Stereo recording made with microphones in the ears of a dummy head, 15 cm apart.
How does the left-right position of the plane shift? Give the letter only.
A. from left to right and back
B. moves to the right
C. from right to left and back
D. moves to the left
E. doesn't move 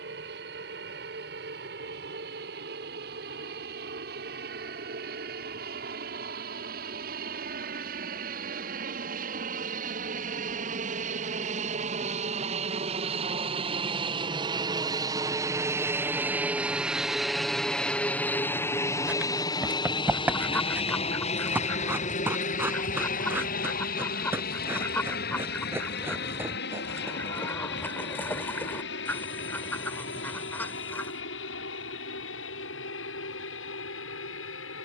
D.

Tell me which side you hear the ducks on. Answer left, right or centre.
centre.